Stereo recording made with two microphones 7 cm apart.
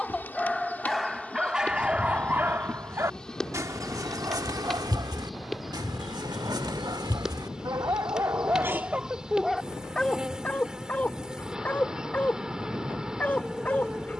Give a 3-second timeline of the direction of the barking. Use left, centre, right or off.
centre, right, right, centre, left.